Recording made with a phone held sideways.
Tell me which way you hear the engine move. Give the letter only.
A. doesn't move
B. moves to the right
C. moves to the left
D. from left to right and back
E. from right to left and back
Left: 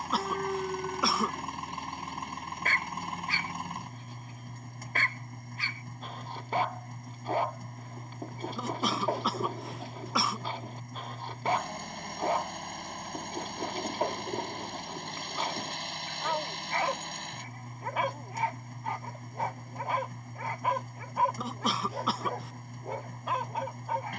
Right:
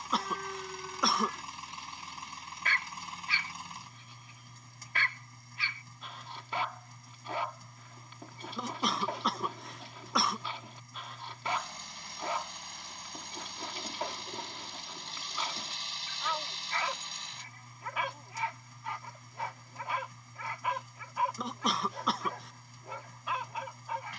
A.